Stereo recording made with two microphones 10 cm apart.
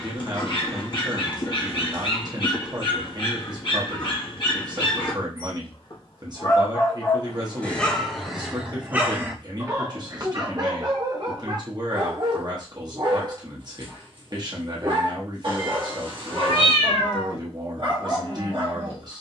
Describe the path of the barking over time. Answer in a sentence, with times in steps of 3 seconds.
You can hear the barking on the left from 0 s, in the centre from 6 s and on the right from 9 s.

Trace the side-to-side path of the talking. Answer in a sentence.
In this clip you hear the talking stay put.